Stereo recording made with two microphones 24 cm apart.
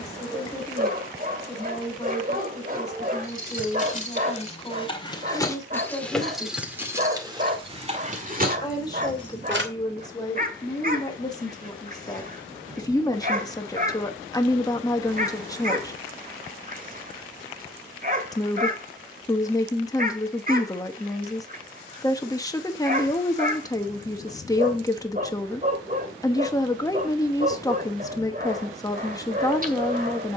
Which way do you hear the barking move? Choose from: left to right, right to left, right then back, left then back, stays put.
stays put.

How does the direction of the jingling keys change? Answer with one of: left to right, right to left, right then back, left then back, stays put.
left to right.